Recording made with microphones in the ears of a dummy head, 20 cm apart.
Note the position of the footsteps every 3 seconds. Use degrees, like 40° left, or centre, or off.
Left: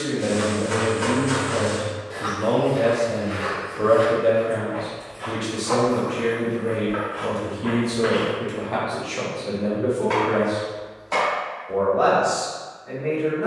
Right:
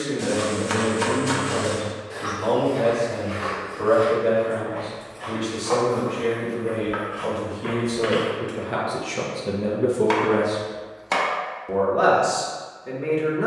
20° right, 20° left, 10° right, off, off.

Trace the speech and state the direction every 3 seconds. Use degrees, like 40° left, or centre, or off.
30° left, 30° left, 10° left, 40° right, 70° right.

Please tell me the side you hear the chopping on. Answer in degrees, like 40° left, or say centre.
80° right.